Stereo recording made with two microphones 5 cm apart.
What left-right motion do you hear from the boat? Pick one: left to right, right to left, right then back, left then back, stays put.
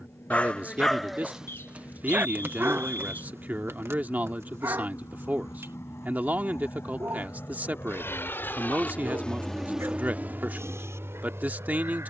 left to right.